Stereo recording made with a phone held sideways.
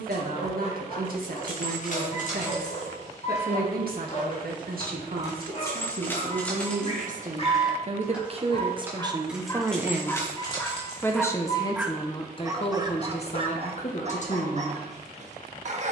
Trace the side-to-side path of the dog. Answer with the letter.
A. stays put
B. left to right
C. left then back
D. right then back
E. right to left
B.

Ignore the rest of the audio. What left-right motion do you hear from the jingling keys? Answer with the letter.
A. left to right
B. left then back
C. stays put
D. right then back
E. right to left
D.